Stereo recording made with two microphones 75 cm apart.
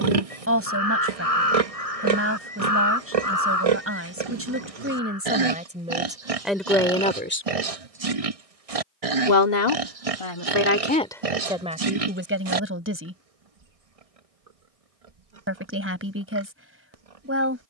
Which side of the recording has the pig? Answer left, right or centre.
right.